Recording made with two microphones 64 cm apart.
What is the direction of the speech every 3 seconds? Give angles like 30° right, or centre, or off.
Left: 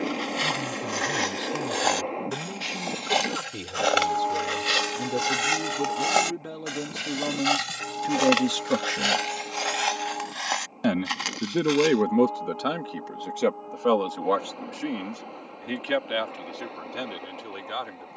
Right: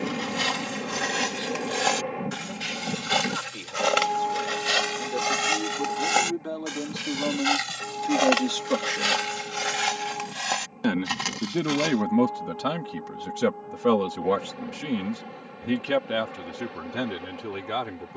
70° left, 60° left, 50° left, centre, 40° right, 70° right.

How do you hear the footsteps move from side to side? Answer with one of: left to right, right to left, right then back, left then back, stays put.
left then back.